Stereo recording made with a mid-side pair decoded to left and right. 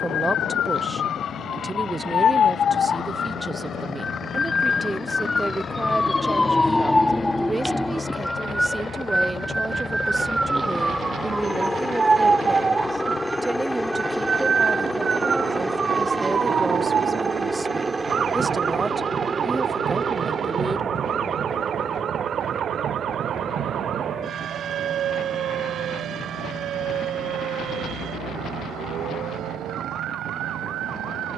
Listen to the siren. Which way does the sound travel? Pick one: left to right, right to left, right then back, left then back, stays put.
left to right.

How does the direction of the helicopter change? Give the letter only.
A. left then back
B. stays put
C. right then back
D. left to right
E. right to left
D.